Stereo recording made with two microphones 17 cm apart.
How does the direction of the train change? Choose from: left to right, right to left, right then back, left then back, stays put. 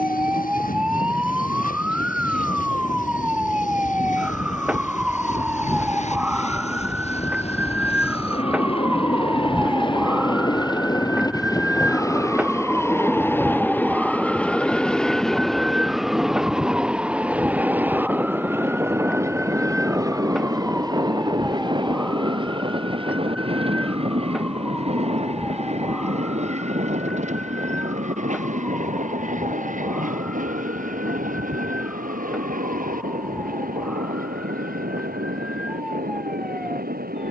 left to right.